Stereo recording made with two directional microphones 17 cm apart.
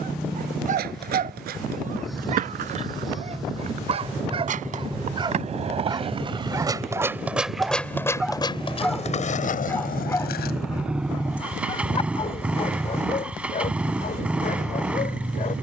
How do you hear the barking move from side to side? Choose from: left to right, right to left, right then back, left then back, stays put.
right to left.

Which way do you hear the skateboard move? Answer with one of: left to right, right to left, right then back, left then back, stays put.
right to left.